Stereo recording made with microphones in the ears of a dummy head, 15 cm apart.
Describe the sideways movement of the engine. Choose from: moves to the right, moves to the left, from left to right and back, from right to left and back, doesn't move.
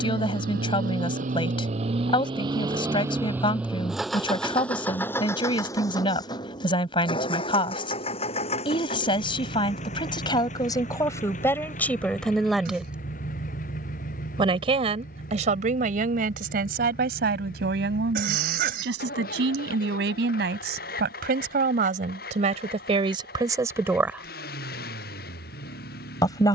moves to the left.